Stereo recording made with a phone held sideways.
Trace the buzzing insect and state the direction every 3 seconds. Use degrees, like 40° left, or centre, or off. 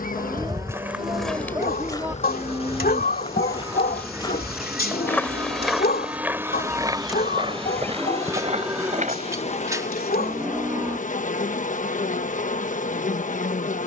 60° left, centre, 10° left, 50° left, 60° left.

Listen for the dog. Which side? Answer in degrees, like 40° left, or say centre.
80° left.